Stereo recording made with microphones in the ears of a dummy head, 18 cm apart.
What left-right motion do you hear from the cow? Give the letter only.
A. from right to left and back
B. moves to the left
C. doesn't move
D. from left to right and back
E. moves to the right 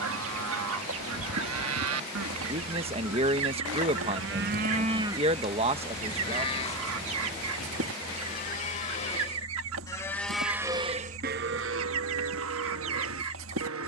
A.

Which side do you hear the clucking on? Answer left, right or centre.
right.